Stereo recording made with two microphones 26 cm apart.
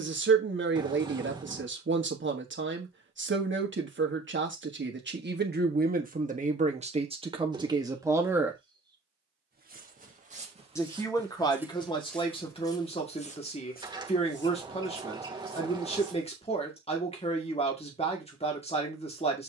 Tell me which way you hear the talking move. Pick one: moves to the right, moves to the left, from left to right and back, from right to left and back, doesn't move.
moves to the left.